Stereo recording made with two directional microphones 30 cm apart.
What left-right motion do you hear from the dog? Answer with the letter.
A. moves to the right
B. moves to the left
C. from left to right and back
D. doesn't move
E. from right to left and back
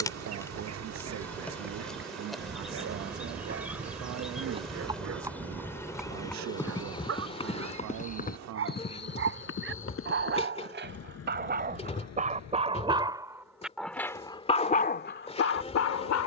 B.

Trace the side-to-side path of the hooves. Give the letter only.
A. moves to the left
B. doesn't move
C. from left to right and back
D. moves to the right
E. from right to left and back
A.